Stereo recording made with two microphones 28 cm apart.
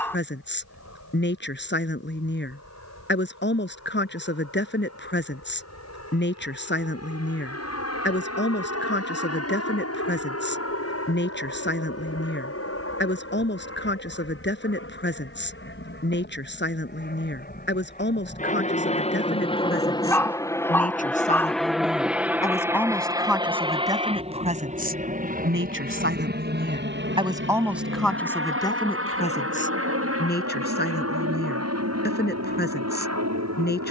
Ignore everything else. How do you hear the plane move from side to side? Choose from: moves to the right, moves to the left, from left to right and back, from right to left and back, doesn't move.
moves to the right.